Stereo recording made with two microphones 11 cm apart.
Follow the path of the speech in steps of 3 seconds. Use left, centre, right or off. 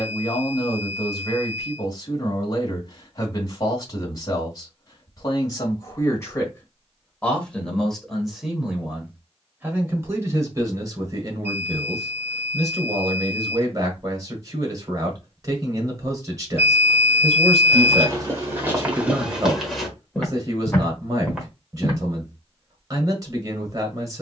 left, left, centre, right, right, right, right, right.